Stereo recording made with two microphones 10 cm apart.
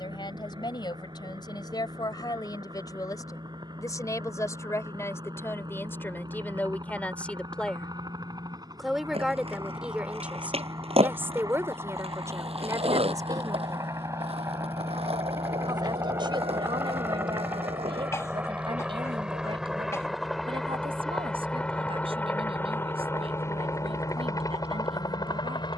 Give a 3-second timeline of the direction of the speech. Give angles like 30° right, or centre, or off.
40° left, 30° left, 10° left, 20° right, 30° right, 50° right, 60° right, 70° right, 70° right.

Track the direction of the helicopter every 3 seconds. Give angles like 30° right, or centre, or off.
50° right, 50° right, 50° right, 40° right, 30° right, 20° right, 10° right, 20° left, 40° left.